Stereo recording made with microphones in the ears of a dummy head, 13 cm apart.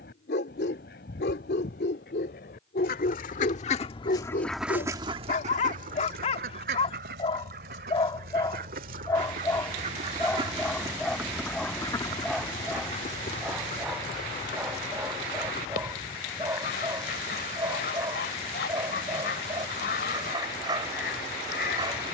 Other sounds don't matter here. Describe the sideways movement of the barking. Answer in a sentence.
In this clip you hear the barking go from the left side to the right.